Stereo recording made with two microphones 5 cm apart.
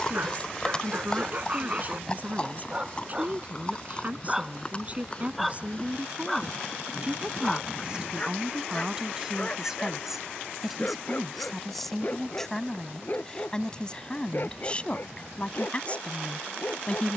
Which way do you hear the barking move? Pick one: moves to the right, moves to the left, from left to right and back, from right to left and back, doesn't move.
moves to the left.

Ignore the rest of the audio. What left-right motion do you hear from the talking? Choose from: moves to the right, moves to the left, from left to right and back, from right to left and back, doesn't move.
moves to the left.